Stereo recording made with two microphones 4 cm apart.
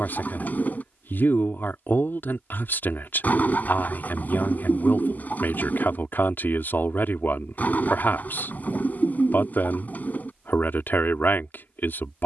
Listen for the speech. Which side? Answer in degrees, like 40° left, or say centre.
60° left.